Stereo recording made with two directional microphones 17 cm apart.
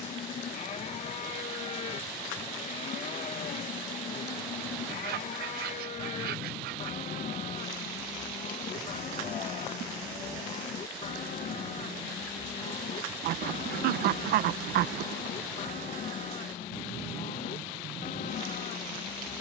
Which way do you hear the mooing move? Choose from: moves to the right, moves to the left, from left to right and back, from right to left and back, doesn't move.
doesn't move.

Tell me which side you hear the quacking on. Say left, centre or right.
right.